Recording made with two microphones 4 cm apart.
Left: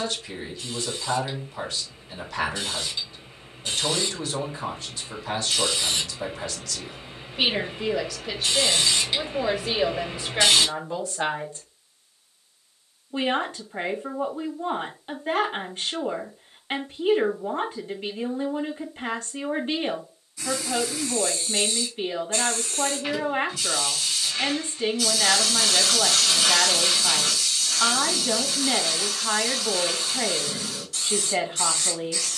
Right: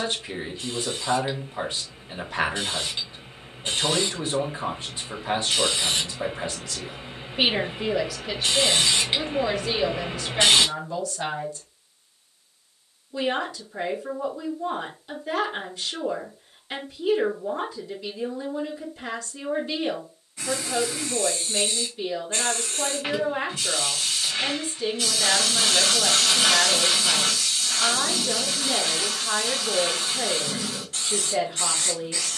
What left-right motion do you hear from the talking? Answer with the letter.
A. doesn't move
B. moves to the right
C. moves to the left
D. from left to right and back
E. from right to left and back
C.